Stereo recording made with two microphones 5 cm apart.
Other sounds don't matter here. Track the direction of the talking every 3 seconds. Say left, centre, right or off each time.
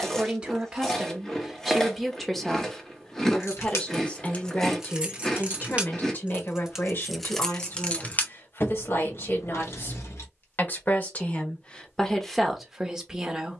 centre, left, left, left, centre.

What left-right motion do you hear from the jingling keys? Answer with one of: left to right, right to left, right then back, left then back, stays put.
right then back.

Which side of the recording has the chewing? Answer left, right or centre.
centre.